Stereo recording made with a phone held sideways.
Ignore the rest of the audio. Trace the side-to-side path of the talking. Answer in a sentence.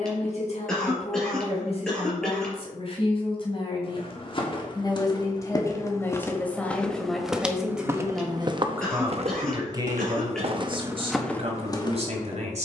In this clip you hear the talking travel towards the right.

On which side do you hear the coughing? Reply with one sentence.
You can hear the coughing in the centre.